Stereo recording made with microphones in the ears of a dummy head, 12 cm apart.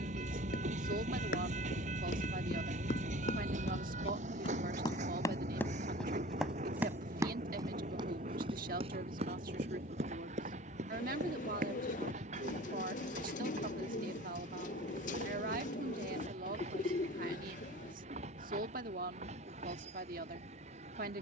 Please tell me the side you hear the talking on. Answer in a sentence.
You can hear the talking on the right.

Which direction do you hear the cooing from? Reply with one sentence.
You can hear the cooing on the left.